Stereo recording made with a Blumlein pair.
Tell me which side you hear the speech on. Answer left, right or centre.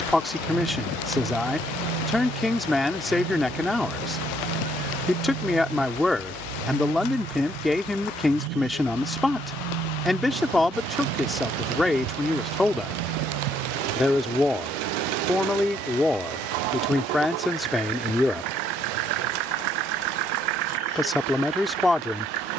centre.